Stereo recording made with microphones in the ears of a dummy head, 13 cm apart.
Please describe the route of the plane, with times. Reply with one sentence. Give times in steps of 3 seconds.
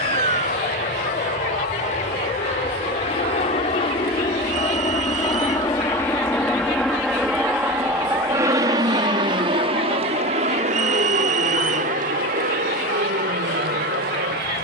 In this clip you hear the plane on the left from 0 s, in the centre from 6 s and on the right from 9 s.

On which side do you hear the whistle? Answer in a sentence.
You can hear the whistle on the right.